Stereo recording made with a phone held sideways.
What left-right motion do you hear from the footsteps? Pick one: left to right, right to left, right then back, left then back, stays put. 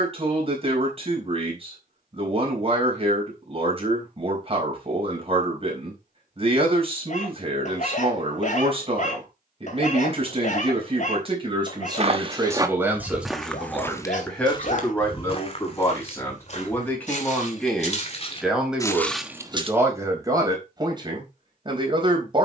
left then back.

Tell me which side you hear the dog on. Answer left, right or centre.
left.